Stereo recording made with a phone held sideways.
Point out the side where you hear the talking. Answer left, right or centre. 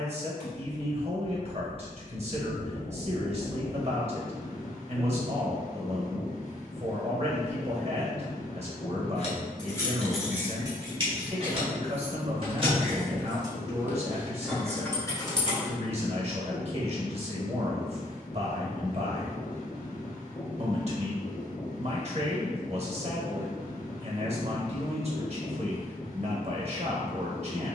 right.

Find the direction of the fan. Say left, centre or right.
left.